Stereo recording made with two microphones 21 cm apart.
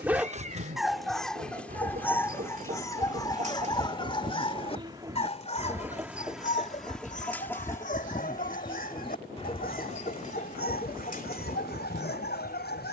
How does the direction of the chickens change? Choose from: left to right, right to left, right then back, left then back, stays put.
right to left.